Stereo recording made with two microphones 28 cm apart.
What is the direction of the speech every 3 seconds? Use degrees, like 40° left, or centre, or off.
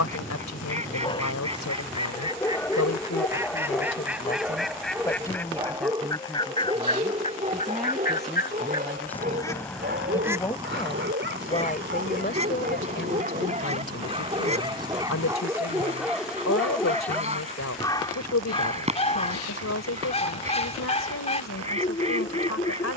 80° left, 30° left, centre, 20° left, 50° left, 70° left, 70° left, 70° left.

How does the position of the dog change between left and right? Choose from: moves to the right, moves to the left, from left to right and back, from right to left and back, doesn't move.
from left to right and back.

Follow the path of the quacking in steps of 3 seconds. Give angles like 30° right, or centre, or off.
20° right, centre, 30° left, 10° right, 20° right, 20° right, 20° right, 20° right.